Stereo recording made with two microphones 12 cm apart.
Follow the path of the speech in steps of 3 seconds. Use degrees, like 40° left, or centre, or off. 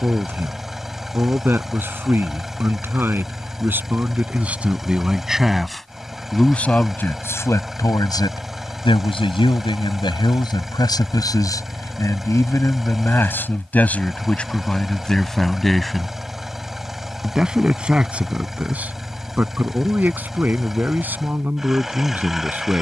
20° right, 10° right, 20° left, 40° left, 20° left, centre, 10° right, 10° right.